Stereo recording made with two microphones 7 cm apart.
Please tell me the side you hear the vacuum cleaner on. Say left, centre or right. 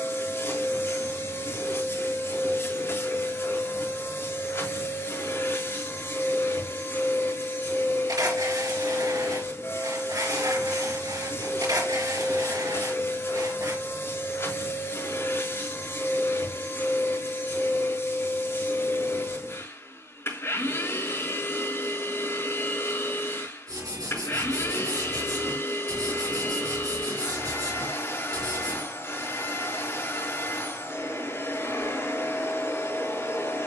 left.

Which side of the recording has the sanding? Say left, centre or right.
right.